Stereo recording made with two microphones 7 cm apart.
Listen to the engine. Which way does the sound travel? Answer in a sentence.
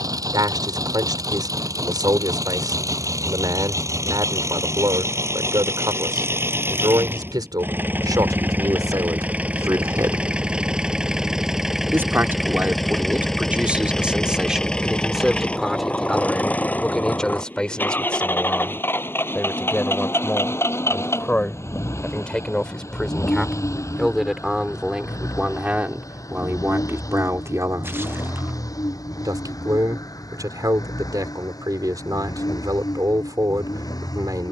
In this clip you hear the engine move to the left.